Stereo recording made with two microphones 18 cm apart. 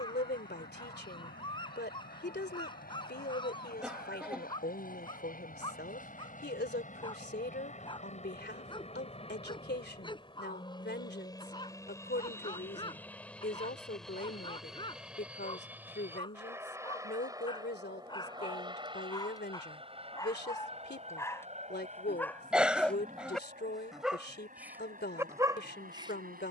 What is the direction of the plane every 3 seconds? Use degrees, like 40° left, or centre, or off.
60° left, 60° left, 40° left, 30° left, 10° left, 10° right, 30° right, 40° right, 50° right.